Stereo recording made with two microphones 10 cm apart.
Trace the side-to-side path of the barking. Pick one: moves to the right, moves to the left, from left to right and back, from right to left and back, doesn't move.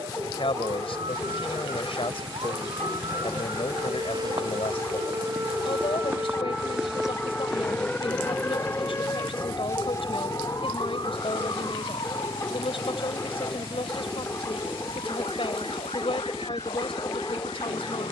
doesn't move.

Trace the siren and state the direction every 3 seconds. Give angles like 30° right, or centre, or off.
60° right, 40° right, centre, 40° left, 60° left, 70° left.